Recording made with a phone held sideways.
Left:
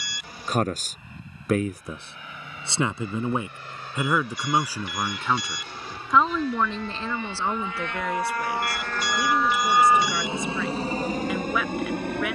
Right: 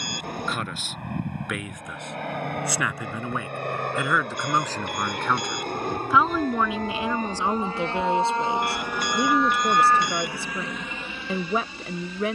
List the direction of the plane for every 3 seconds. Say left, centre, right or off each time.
right, right, right, left.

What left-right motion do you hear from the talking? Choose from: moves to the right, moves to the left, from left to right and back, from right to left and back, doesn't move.
moves to the right.